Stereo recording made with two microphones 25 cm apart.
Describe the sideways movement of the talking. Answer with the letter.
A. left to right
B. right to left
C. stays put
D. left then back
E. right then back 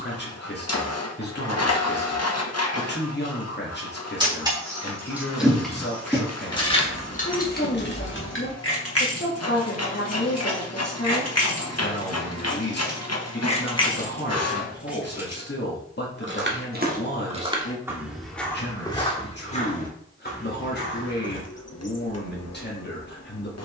C.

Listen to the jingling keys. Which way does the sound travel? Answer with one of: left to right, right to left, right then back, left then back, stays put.
left then back.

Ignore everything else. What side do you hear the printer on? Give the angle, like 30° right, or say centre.
70° left.